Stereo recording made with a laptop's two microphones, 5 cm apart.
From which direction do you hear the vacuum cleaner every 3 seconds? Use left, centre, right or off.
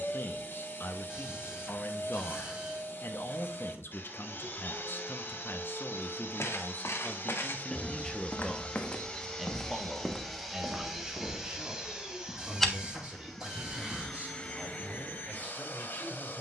left, left, left, centre, centre, left.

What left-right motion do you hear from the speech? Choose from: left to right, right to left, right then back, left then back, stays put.
left to right.